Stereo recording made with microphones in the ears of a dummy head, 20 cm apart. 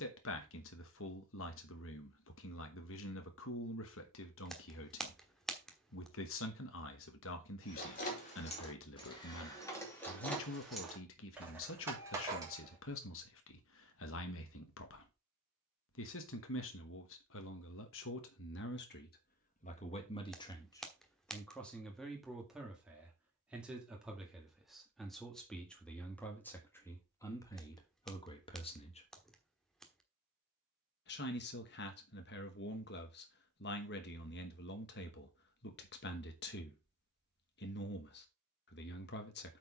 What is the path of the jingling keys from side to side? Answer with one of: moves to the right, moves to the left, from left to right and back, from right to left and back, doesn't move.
moves to the right.